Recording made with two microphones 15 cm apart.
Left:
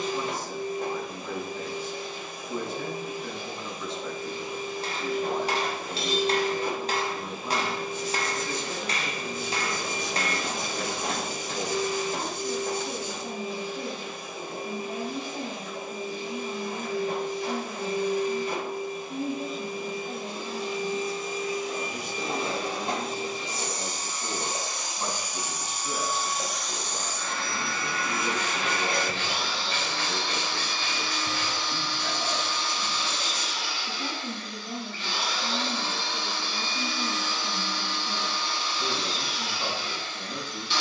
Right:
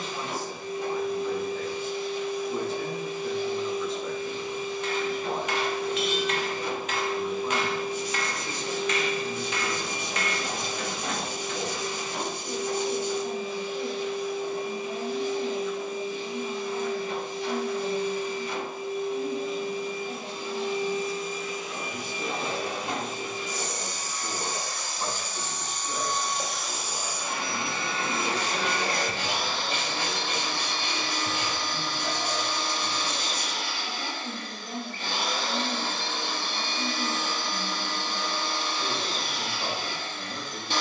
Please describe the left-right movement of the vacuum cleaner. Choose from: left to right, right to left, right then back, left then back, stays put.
left to right.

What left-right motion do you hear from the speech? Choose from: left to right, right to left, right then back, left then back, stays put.
stays put.